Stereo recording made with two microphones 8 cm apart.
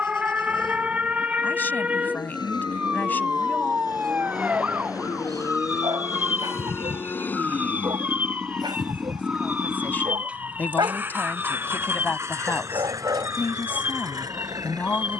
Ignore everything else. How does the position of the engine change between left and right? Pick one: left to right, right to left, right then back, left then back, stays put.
left to right.